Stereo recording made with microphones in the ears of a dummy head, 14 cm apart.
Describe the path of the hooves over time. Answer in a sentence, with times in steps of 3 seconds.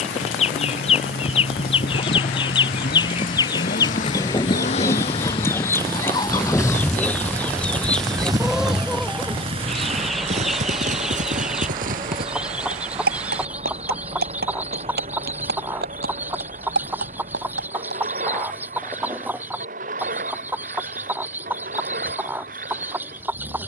In this clip you hear the hooves on the left from 0 s, in the centre from 6 s, on the right from 9 s and not at all from 18 s.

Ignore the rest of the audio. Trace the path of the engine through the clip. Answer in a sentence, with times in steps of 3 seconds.
You can hear the engine on the left from 0 s, in the centre from 6 s and on the right from 9 s.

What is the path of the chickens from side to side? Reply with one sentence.
In this clip you hear the chickens move from left to right.